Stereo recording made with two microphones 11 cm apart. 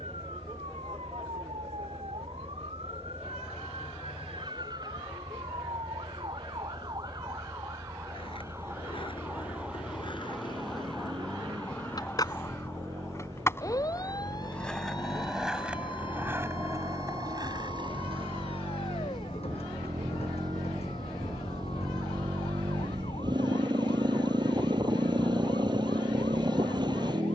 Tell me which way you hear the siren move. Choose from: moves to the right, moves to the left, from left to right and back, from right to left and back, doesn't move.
moves to the left.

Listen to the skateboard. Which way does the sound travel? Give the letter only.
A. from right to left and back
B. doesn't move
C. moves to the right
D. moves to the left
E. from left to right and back
C.